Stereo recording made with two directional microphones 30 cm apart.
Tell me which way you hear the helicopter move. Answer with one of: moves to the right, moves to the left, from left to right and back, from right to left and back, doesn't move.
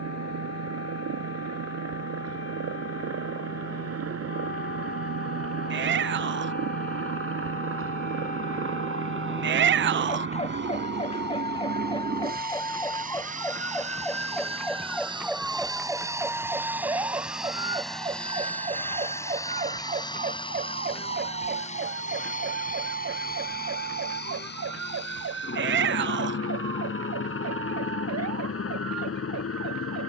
moves to the left.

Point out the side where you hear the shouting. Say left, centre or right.
right.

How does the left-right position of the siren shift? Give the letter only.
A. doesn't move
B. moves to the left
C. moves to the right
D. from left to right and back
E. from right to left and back
C.